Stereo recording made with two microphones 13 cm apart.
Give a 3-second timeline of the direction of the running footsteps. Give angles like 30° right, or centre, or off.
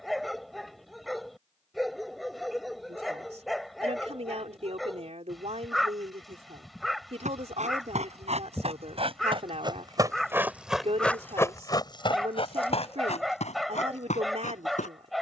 off, off, 60° right, 10° right, 60° left.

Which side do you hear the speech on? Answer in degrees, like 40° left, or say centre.
60° right.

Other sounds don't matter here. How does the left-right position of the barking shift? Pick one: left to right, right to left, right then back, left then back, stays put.
stays put.